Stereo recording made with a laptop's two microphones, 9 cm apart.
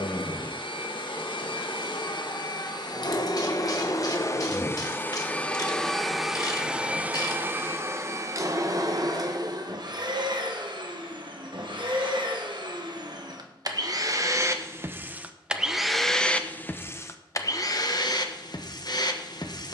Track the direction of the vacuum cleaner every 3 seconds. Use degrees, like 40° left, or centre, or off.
60° left, 30° left, 20° right, 50° right, 40° right, 20° left, 50° left.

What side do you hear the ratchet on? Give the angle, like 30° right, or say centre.
50° left.